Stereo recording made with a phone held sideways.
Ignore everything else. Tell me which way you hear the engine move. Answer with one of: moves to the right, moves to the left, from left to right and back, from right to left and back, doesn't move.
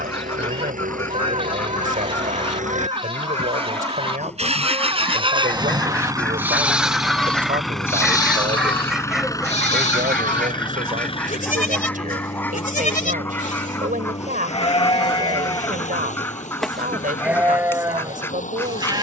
moves to the left.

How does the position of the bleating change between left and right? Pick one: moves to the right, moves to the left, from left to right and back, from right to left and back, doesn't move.
from right to left and back.